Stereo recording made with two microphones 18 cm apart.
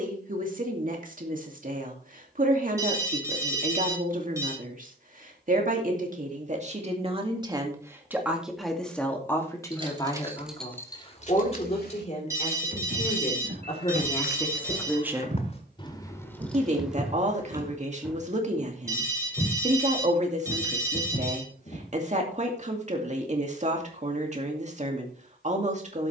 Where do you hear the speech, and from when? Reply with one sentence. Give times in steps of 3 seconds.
In this clip you hear the speech on the right from 0 s, on the left from 9 s and on the right from 15 s.